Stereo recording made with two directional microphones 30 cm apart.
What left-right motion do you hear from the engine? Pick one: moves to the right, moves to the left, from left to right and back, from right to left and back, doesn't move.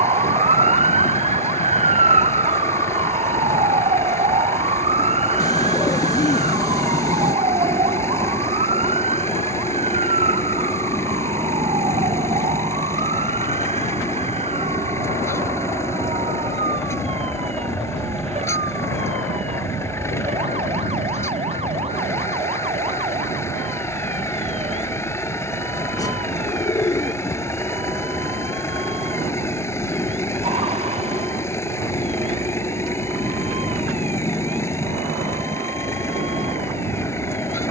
doesn't move.